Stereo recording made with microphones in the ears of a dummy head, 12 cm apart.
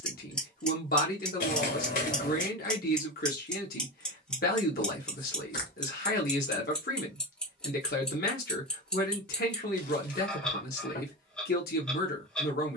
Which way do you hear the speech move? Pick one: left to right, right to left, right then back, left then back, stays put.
stays put.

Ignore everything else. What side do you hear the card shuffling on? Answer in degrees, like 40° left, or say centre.
60° left.